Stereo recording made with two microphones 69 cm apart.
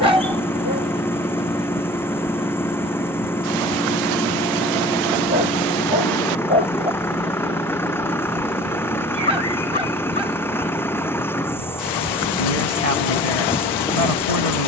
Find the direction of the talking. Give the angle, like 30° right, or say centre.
60° left.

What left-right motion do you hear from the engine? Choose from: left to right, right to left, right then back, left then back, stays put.
stays put.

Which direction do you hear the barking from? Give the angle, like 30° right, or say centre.
40° left.